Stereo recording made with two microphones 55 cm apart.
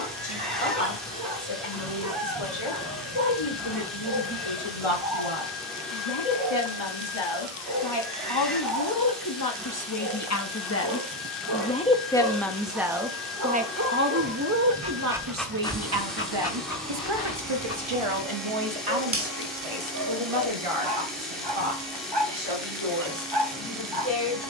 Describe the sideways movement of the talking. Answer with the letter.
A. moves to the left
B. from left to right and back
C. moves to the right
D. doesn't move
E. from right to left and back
C.